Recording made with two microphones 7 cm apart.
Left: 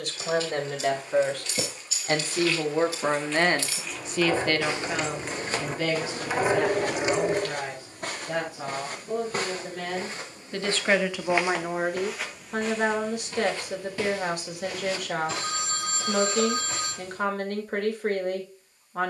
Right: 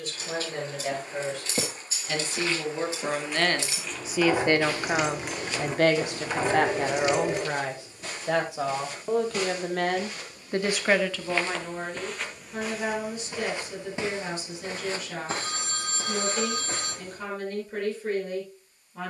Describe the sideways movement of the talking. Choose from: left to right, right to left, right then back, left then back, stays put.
right then back.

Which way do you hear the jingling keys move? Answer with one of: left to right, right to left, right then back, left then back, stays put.
right to left.